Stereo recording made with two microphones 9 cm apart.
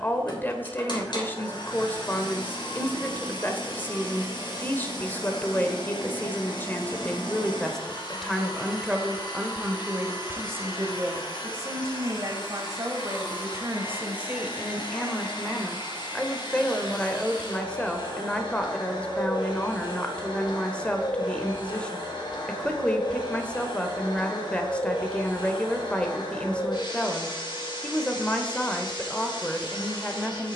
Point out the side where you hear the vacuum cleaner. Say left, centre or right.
left.